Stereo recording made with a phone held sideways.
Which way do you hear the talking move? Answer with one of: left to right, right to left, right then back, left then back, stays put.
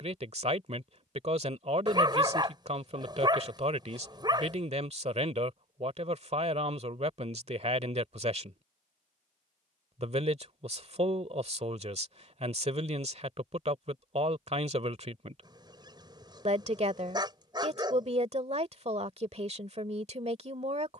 stays put.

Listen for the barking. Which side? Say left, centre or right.
right.